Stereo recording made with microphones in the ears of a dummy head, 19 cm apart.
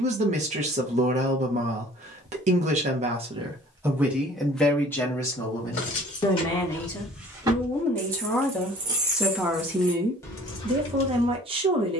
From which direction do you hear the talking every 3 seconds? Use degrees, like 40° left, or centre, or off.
30° right, centre, 10° left, 20° right.